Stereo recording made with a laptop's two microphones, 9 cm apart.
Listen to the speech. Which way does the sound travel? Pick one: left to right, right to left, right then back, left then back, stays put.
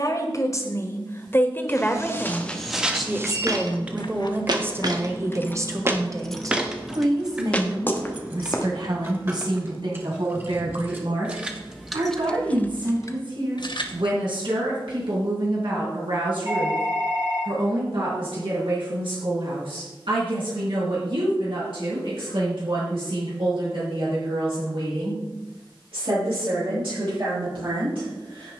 left to right.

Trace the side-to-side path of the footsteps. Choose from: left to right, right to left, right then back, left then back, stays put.
right then back.